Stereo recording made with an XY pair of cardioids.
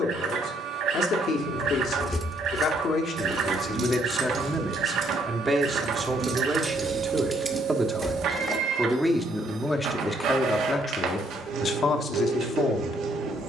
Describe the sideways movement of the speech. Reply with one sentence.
In this clip you hear the speech go right and come back.